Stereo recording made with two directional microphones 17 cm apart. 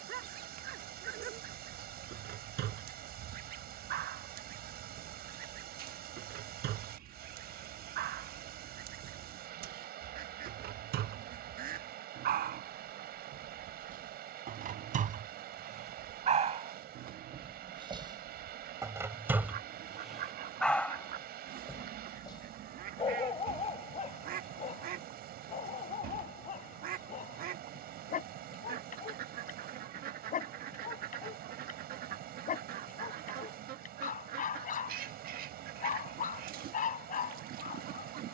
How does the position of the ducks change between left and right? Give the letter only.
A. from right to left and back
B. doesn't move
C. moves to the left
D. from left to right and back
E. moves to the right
B.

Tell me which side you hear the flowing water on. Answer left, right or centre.
right.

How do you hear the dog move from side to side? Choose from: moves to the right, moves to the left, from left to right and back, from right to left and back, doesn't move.
moves to the left.